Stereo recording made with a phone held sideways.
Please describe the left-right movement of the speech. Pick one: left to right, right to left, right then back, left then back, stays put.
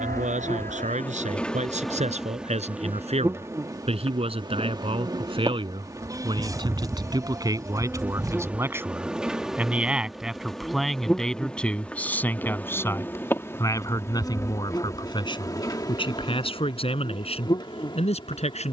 right to left.